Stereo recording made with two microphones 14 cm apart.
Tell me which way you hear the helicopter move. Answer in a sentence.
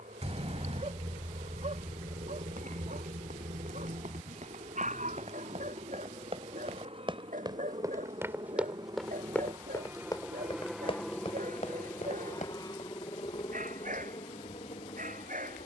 You can hear the helicopter move from right to left.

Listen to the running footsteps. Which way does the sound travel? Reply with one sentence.
In this clip you hear the running footsteps move to the left.